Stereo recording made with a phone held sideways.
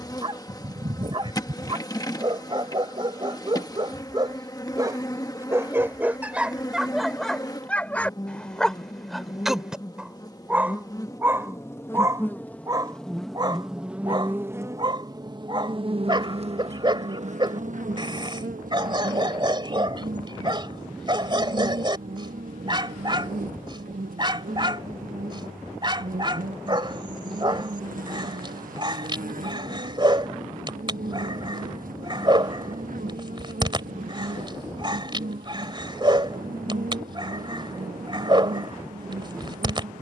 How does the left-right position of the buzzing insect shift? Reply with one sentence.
You can hear the buzzing insect travel towards the right.